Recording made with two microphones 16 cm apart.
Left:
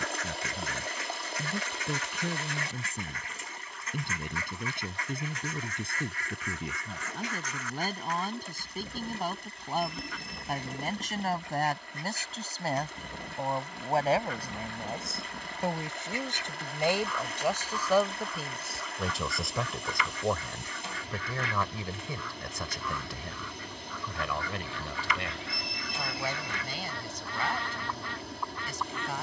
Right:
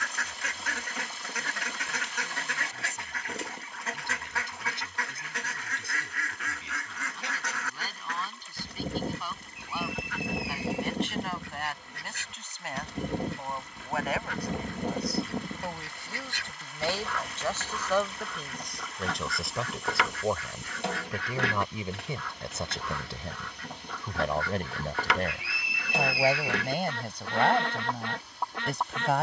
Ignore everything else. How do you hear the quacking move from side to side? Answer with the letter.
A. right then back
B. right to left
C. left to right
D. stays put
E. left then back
D.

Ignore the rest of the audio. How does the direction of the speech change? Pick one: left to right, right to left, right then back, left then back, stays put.
left to right.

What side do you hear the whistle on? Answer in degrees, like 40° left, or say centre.
10° right.